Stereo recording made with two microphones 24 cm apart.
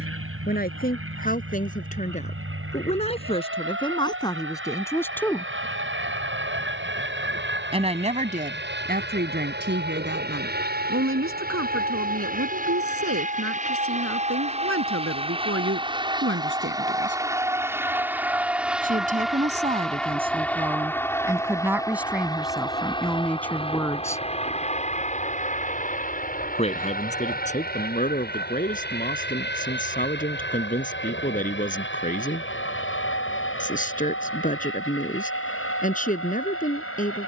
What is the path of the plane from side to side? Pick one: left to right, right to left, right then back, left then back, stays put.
right to left.